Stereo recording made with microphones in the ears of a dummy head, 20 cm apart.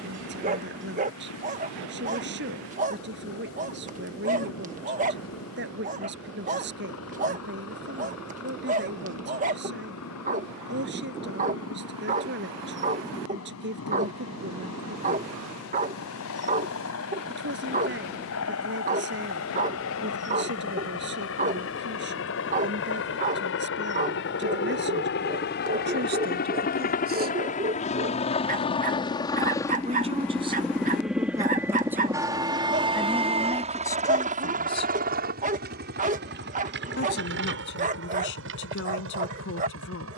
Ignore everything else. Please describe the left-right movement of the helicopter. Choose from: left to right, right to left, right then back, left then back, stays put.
left to right.